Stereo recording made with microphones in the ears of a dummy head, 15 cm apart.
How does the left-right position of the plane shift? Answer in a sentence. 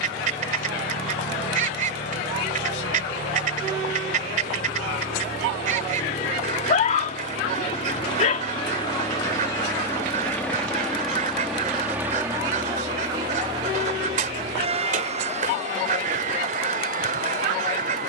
You can hear the plane move to the right.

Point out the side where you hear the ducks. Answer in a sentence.
In this clip you hear the ducks on the right.